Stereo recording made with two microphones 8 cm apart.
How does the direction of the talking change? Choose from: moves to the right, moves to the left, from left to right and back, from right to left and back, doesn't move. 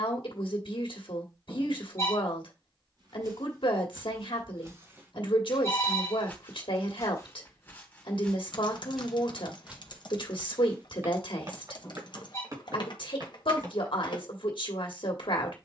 doesn't move.